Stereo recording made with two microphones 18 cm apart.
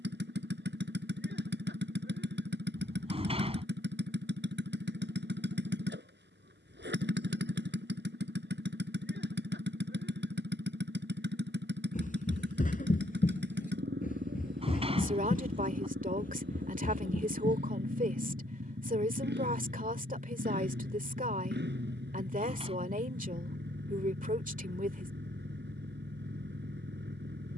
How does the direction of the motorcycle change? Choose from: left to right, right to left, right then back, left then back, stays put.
stays put.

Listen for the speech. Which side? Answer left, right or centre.
right.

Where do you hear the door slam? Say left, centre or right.
right.